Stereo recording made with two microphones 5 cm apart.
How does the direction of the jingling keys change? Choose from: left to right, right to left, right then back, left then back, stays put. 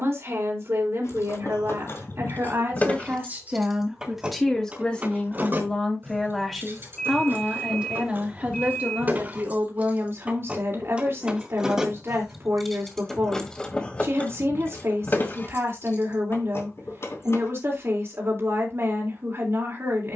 right then back.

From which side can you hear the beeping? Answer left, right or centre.
centre.